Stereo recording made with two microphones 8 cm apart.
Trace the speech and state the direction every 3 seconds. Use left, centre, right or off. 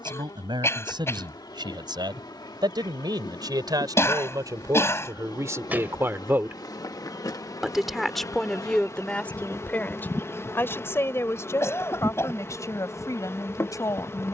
right, right, centre, left, left.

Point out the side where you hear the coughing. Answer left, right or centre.
left.